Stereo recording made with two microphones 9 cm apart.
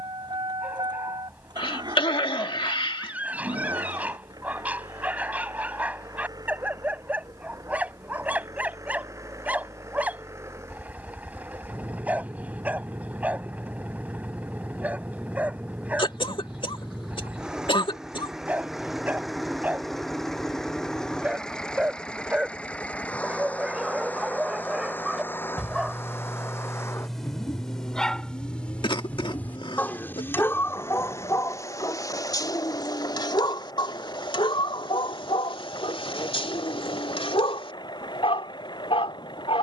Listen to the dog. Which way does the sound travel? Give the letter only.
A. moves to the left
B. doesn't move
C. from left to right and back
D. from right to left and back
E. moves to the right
A.